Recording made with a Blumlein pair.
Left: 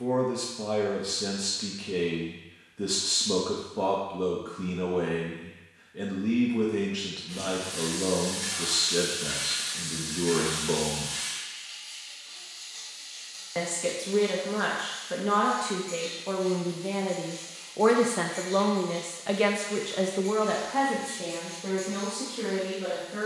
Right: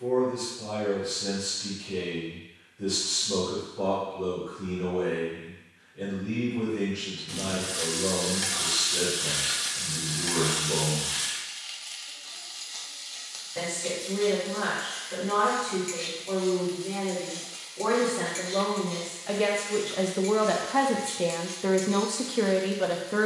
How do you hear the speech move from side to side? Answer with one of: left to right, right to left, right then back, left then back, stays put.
left to right.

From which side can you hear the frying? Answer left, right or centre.
right.